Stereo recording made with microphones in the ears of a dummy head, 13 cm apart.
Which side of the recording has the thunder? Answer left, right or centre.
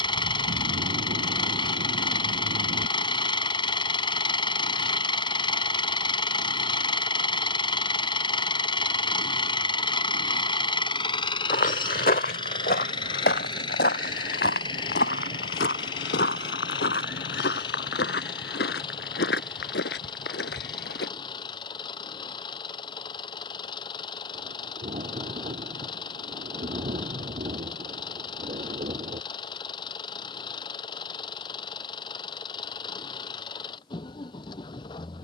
right.